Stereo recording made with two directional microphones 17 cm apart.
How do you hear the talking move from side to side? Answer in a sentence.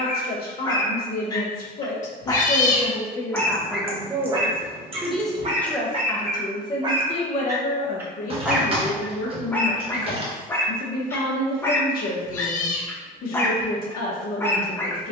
In this clip you hear the talking go right and come back.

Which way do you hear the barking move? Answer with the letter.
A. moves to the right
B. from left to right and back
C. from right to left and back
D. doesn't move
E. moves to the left
B.